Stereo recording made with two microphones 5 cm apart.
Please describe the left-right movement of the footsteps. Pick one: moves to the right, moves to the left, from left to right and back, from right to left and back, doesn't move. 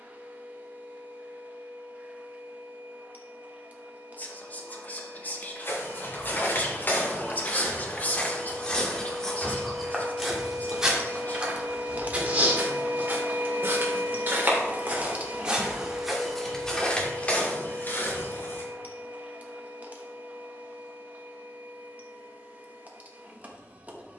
from left to right and back.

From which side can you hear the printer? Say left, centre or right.
right.